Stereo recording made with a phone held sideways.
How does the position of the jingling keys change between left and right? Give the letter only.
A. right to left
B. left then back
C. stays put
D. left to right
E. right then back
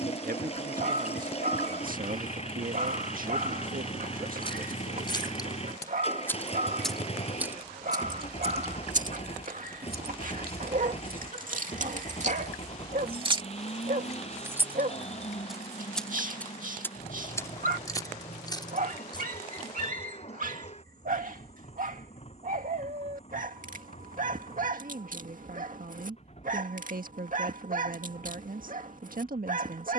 E.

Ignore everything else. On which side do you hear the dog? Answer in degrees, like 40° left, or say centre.
50° right.